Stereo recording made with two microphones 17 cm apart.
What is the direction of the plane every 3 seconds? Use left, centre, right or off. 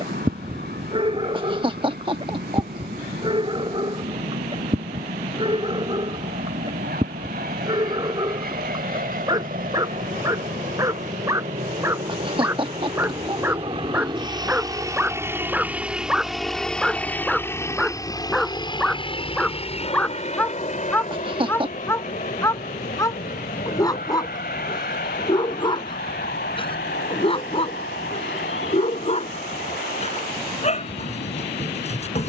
right, right, right, right, right, centre, left, left, left, left, left.